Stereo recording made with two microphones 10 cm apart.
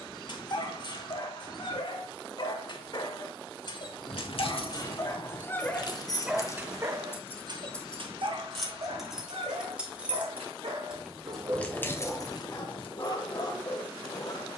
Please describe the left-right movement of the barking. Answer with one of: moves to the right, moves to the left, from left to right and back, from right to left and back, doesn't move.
from left to right and back.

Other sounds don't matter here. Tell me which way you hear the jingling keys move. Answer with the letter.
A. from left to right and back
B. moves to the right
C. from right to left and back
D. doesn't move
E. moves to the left
A.